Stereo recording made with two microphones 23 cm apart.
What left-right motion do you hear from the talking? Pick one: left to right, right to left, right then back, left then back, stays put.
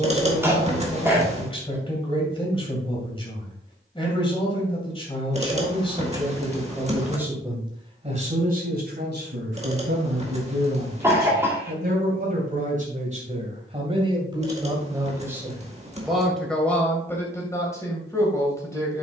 right then back.